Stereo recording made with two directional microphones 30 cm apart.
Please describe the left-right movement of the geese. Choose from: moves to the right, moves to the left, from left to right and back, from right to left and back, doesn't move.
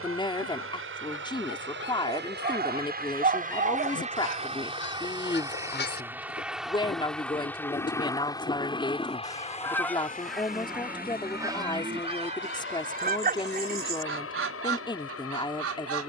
moves to the right.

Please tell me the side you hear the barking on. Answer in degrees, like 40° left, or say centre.
30° right.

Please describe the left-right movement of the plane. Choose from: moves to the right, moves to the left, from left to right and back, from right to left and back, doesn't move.
moves to the left.